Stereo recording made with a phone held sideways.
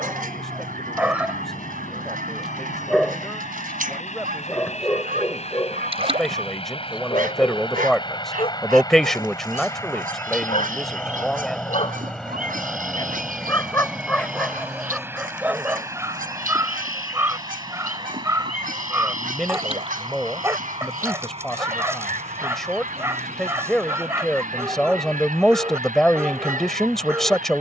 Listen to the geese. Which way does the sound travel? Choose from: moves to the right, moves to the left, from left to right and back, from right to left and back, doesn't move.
doesn't move.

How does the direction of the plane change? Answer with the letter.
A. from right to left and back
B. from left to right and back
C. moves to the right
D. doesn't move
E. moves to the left
C.